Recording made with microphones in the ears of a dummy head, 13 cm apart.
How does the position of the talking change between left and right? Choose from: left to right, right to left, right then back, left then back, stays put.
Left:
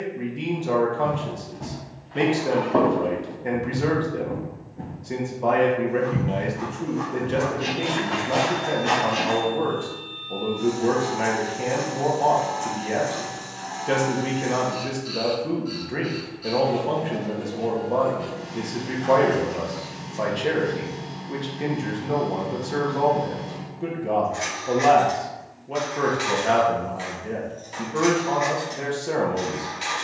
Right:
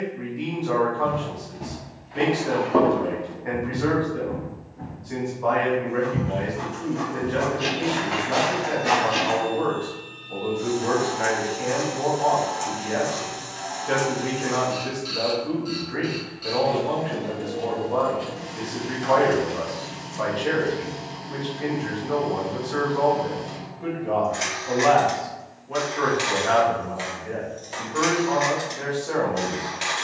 stays put.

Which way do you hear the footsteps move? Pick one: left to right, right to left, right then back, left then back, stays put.
left then back.